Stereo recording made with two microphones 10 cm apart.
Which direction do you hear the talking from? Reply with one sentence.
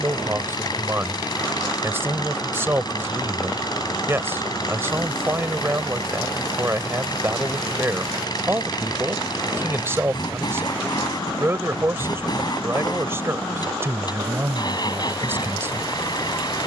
You can hear the talking on the right.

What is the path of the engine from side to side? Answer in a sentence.
You can hear the engine stay put.